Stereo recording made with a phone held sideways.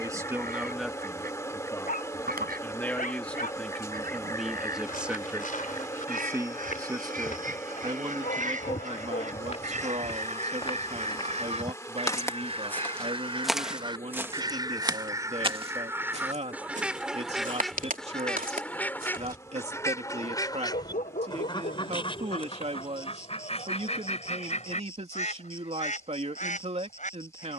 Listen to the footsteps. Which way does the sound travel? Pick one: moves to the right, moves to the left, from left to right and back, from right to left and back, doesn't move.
moves to the right.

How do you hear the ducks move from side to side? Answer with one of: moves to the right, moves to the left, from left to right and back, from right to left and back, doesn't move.
moves to the left.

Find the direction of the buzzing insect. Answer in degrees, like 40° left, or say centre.
20° left.